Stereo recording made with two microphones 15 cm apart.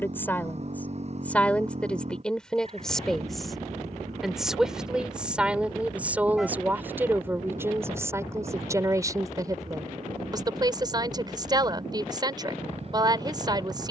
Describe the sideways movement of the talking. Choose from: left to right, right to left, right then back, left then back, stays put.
left to right.